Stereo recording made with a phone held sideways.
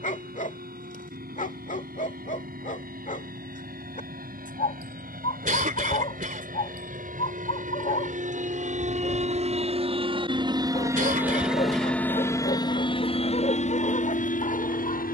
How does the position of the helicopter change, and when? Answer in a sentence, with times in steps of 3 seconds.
You can hear the helicopter on the right from 0 s and on the left from 12 s.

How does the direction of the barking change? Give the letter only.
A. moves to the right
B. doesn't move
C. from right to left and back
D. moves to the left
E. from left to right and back
B.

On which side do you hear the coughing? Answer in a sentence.
In this clip you hear the coughing on the right.